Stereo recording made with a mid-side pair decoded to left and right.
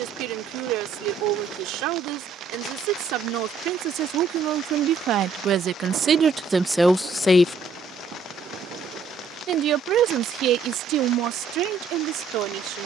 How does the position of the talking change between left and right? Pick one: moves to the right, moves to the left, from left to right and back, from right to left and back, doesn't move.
from right to left and back.